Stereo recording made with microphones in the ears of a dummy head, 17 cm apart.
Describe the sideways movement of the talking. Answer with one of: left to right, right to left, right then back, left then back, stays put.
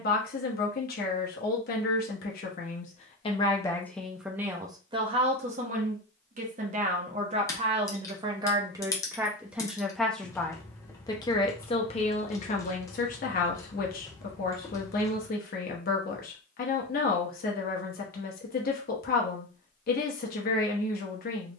right then back.